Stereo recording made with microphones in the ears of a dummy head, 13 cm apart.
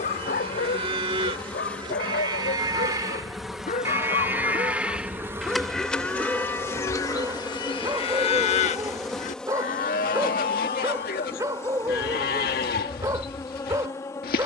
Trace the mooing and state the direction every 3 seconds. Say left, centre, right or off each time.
right, centre, left, left, left.